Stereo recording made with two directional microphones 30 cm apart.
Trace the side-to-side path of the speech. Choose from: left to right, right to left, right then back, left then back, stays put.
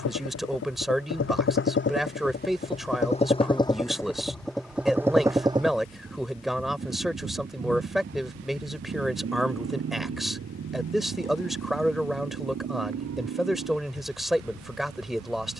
stays put.